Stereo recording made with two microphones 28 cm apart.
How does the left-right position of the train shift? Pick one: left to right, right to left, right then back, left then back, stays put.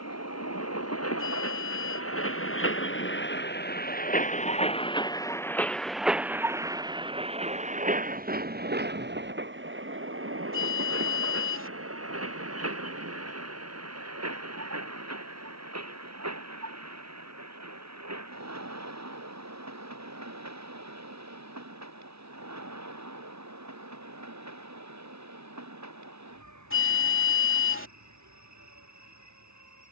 left to right.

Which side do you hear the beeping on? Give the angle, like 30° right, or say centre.
50° left.